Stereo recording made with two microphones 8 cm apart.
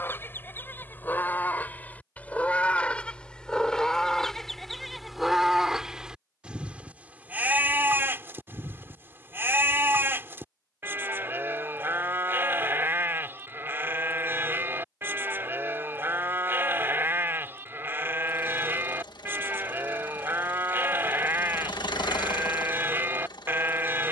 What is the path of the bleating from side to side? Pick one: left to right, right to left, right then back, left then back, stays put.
left to right.